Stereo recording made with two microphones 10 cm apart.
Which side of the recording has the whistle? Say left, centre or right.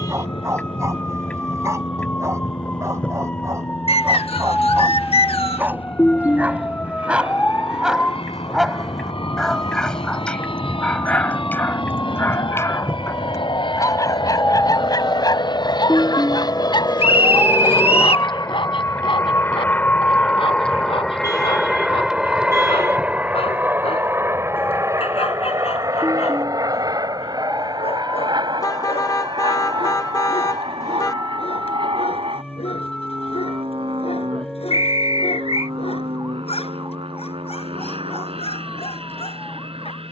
left.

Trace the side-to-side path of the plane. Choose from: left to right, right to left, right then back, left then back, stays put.
left to right.